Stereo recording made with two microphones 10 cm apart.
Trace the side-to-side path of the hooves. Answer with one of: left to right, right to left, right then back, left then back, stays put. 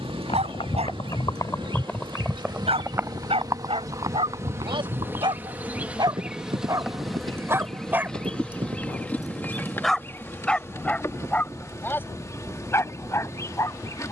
left to right.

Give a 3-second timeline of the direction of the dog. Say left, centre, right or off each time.
right, right, right, centre, left.